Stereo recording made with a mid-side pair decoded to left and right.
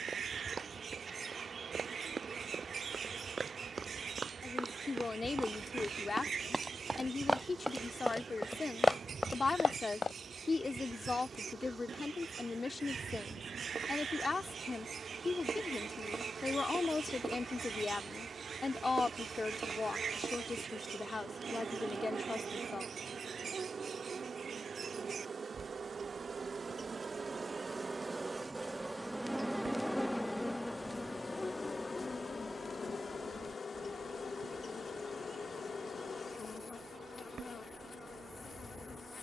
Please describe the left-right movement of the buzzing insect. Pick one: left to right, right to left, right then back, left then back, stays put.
right to left.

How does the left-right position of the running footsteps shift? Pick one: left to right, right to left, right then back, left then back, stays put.
right to left.